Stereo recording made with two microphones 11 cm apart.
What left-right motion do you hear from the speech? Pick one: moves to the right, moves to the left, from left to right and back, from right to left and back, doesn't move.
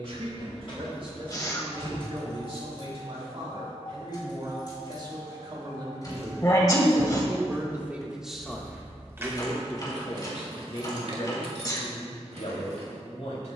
moves to the left.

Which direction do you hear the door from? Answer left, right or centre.
left.